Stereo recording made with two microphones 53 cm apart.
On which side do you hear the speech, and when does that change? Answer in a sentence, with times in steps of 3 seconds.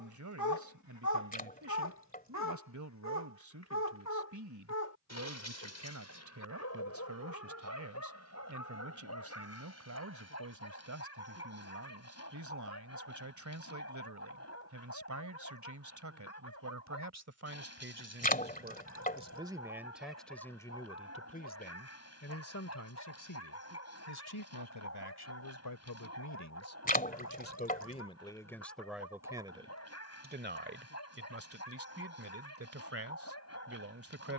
In this clip you hear the speech on the right from 0 s, in the centre from 18 s, on the left from 21 s, in the centre from 27 s and on the right from 30 s.